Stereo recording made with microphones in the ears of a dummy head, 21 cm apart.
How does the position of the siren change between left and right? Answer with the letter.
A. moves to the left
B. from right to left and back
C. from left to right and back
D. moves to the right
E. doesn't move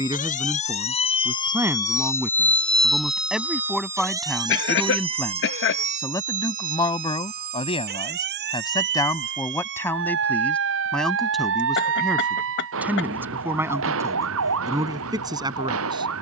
D.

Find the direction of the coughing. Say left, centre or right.
left.